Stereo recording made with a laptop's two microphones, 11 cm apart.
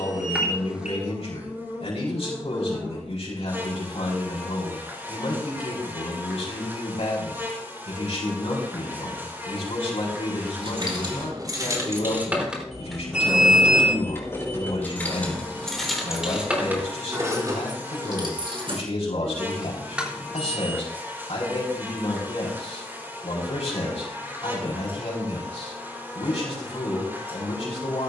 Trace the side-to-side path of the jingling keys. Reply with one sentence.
You can hear the jingling keys go left and come back.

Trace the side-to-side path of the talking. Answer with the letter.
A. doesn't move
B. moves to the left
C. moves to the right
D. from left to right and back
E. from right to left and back
A.